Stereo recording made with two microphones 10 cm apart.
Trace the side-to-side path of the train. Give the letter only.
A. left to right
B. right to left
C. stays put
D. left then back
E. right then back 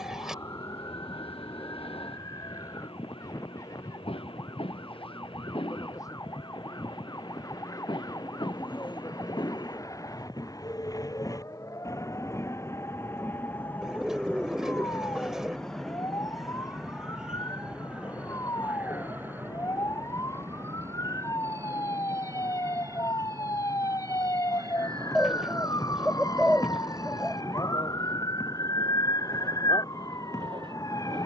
A.